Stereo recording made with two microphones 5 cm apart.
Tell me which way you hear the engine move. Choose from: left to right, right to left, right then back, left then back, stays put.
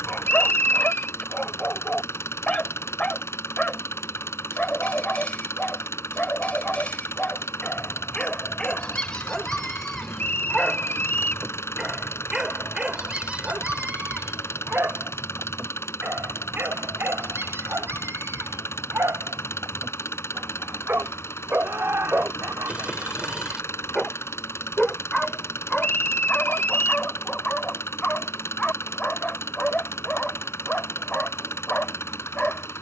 stays put.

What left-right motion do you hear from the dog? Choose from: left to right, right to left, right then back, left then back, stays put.
right then back.